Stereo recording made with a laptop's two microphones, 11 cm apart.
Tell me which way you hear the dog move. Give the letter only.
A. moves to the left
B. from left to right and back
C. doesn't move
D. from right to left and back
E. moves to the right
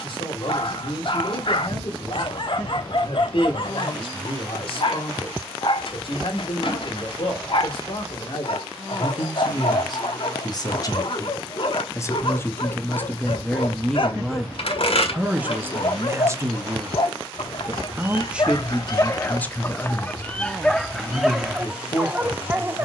E.